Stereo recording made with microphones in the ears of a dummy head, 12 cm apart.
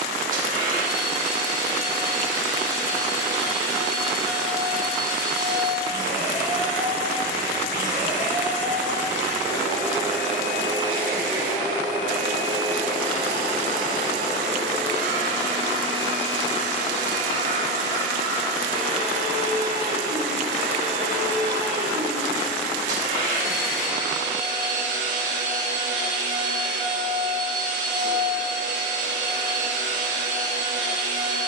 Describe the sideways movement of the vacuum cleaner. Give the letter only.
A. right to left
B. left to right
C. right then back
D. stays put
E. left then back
D.